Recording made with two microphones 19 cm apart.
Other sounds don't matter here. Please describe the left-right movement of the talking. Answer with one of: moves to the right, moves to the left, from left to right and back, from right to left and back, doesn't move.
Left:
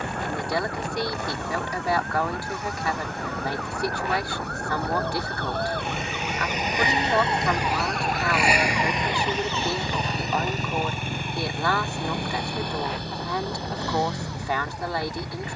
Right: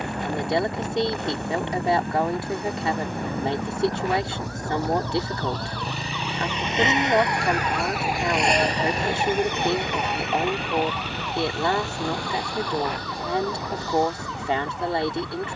doesn't move.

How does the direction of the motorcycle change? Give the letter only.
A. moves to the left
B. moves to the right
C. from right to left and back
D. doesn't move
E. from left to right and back
A.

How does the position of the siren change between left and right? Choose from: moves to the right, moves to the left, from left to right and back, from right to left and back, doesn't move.
moves to the right.